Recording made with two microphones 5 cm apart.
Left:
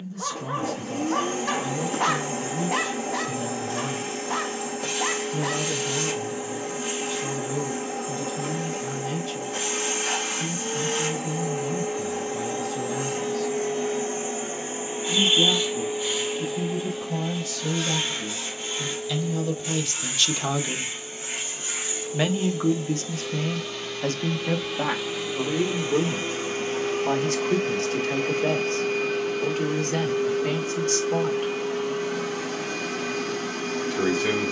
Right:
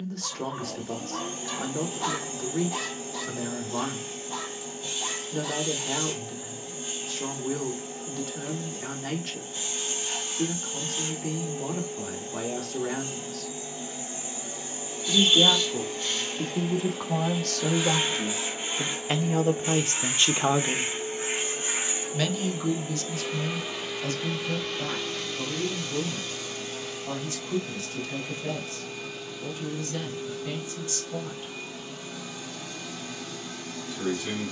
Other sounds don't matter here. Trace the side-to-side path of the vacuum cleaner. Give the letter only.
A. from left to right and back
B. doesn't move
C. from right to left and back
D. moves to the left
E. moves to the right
A.